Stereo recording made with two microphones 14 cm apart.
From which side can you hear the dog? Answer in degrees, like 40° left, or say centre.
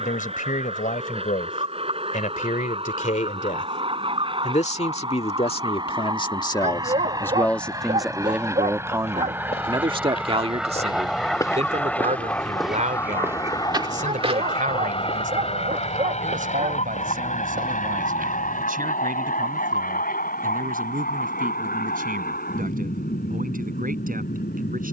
50° right.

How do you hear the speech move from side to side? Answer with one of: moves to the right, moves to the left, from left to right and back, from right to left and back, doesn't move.
moves to the right.